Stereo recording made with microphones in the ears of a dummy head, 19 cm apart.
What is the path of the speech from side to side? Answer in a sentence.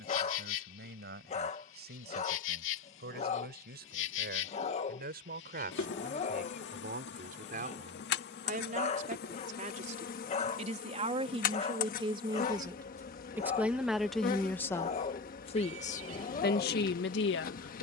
In this clip you hear the speech move to the left.